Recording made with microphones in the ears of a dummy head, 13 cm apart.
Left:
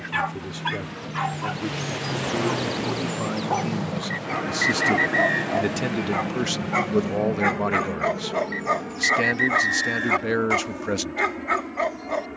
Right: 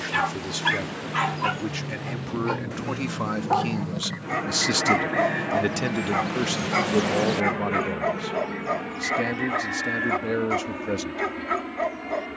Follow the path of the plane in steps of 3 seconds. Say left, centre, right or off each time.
left, centre, right, right.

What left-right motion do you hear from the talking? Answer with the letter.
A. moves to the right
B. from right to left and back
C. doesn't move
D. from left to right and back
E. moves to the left
E.